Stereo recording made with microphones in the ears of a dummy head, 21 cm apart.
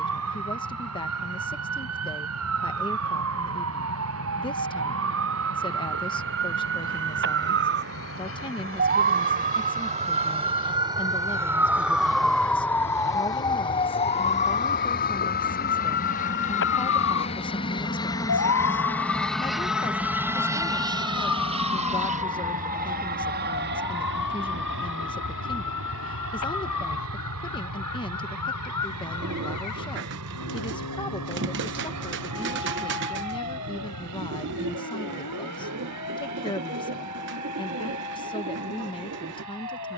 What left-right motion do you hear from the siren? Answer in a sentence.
You can hear the siren travel towards the left.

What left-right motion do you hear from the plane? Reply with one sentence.
You can hear the plane move to the right.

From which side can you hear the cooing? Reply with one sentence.
You can hear the cooing on the right.